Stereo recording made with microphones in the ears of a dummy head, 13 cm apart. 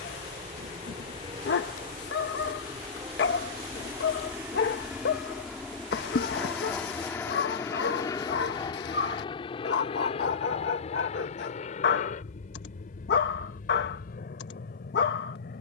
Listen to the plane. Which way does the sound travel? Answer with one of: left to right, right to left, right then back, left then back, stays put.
right to left.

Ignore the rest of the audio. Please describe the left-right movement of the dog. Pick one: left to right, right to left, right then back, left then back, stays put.
stays put.